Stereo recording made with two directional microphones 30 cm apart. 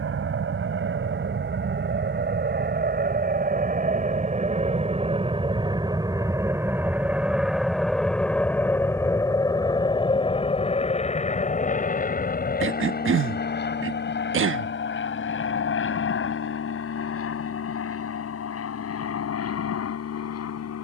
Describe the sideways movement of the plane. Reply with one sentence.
You can hear the plane travel towards the left.